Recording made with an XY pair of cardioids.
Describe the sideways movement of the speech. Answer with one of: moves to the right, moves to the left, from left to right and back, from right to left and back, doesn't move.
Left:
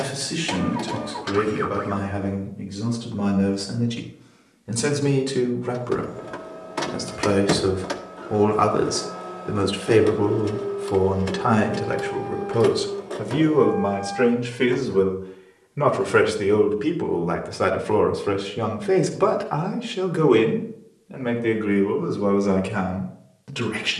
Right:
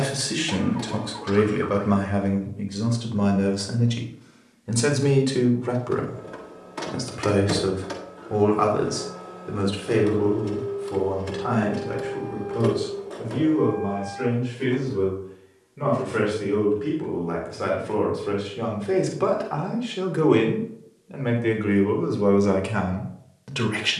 from right to left and back.